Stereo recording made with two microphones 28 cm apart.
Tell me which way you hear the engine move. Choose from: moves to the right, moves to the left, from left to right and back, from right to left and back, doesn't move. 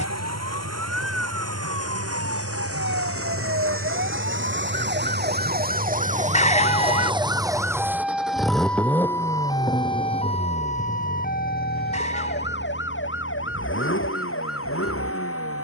moves to the left.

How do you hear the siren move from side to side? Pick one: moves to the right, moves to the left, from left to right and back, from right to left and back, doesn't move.
moves to the left.